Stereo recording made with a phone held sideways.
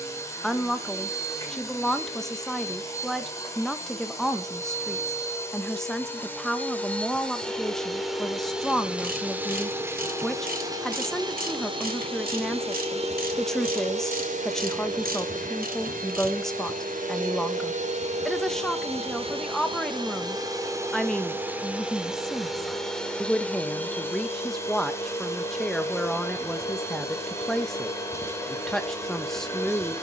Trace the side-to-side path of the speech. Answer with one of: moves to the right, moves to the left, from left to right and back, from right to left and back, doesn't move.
doesn't move.